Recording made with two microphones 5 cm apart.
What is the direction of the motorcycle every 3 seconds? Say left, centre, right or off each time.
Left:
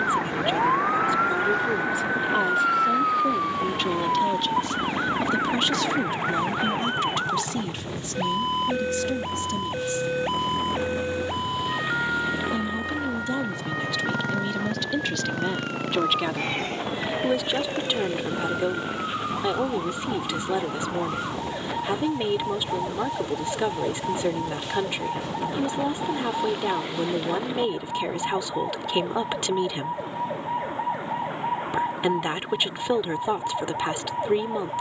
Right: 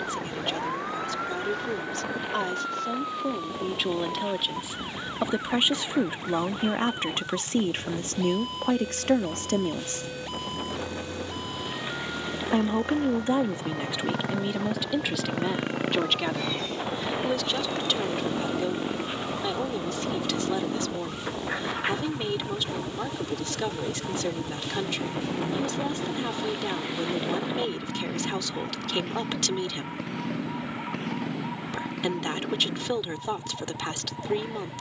left, left, left, left, centre, right, right, right, right, right, right, right.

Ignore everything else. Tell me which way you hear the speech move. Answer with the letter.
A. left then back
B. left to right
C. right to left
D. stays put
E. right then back
E.